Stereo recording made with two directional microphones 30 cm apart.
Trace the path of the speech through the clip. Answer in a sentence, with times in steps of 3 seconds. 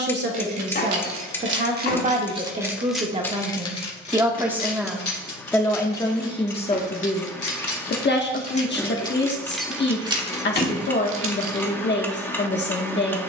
In this clip you hear the speech on the right from 0 s, in the centre from 3 s and on the left from 6 s.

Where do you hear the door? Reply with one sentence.
You can hear the door on the left.